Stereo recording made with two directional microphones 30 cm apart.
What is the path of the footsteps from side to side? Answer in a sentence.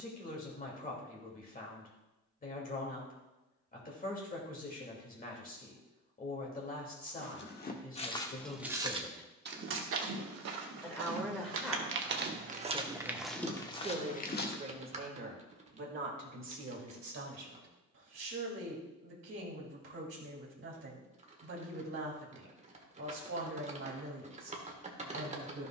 You can hear the footsteps move from left to right and back again.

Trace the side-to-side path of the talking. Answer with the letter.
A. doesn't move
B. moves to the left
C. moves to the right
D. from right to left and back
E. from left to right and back
C.